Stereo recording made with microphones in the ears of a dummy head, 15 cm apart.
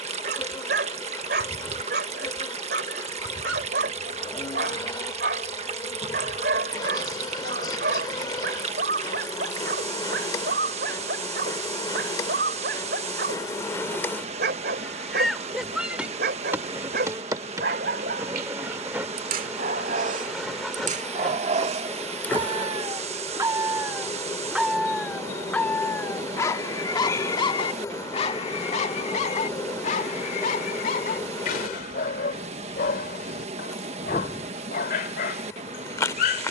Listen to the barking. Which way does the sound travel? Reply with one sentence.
You can hear the barking travel towards the left.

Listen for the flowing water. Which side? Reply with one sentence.
In this clip you hear the flowing water on the right.